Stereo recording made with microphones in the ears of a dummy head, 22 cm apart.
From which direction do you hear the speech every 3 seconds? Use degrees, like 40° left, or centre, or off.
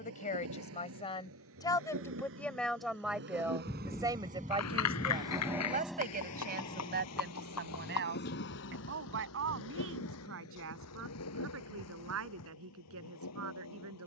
20° left, 20° right, 40° right, 60° right, 60° right.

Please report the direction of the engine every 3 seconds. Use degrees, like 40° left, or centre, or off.
60° right, 30° right, 30° left, 60° left, 70° left.